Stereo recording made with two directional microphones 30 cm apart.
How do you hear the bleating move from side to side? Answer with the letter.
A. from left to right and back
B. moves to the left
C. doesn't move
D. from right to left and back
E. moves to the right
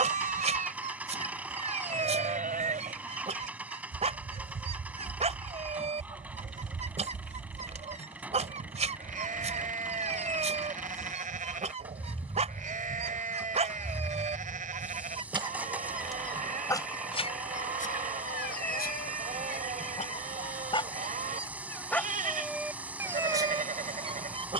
C.